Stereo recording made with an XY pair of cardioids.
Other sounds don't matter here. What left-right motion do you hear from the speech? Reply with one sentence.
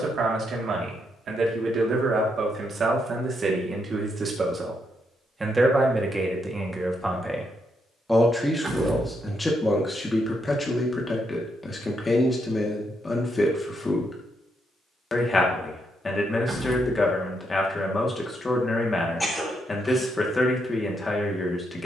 You can hear the speech move from right to left.